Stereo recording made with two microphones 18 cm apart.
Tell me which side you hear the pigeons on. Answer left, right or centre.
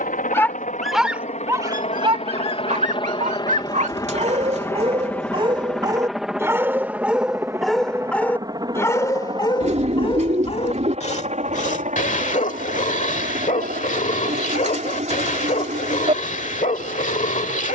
right.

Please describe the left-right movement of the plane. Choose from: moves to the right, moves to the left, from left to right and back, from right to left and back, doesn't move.
moves to the right.